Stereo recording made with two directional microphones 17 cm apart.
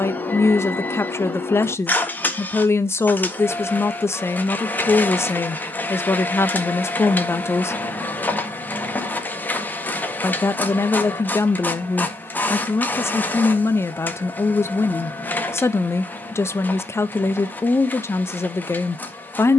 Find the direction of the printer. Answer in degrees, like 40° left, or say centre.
10° left.